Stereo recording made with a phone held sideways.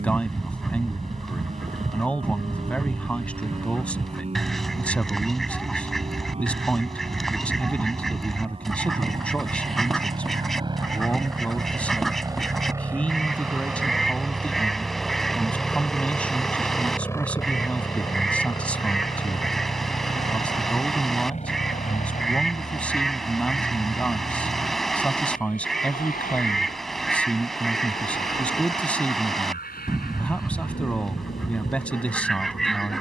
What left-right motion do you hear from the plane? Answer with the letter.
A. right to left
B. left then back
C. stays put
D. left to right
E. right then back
A.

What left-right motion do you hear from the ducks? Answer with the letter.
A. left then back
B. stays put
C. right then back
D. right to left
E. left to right
B.